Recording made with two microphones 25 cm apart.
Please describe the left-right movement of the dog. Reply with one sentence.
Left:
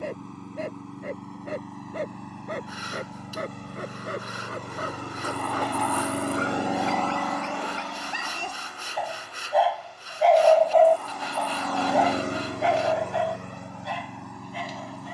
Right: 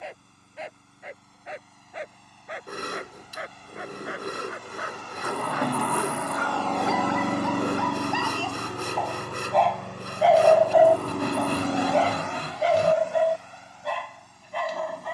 In this clip you hear the dog move from left to right.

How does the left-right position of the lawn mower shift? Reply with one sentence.
In this clip you hear the lawn mower move from left to right and back again.